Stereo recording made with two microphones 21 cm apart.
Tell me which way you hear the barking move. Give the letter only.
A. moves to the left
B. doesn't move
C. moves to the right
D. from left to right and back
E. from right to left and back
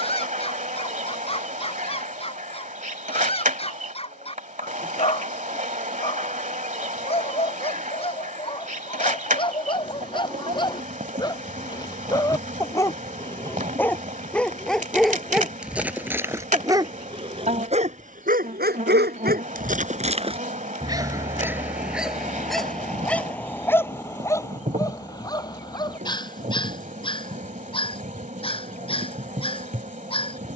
D.